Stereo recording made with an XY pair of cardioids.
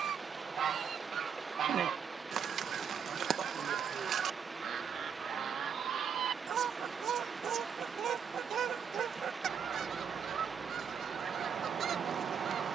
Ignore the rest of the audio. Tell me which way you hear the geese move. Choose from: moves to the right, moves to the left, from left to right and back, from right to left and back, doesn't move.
doesn't move.